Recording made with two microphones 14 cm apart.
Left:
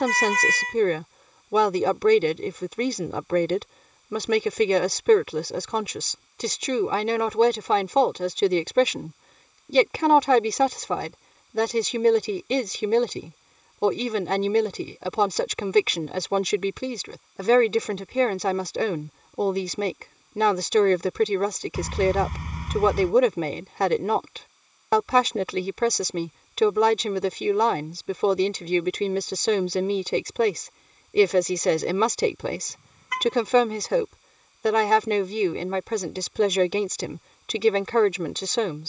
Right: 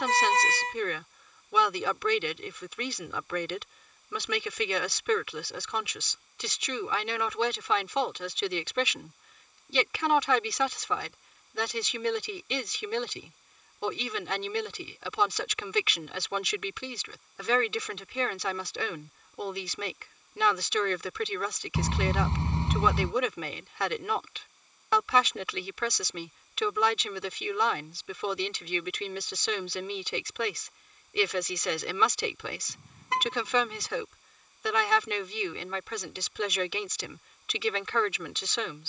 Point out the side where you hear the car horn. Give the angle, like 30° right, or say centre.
30° right.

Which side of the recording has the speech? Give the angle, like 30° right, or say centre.
40° left.